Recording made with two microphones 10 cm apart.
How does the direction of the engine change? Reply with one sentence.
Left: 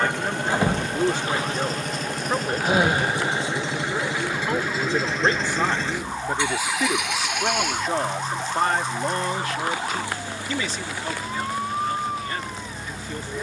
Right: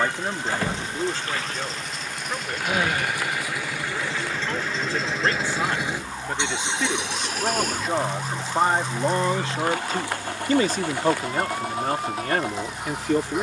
You can hear the engine move to the right.